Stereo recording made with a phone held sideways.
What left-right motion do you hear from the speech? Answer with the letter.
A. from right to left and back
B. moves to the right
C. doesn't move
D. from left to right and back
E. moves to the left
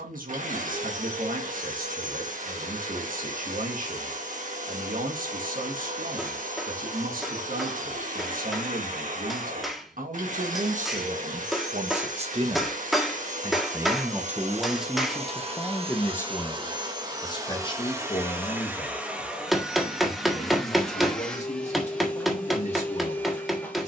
E.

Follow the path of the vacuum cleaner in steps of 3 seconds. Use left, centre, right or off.
right, right, right, right, right, right, centre, centre.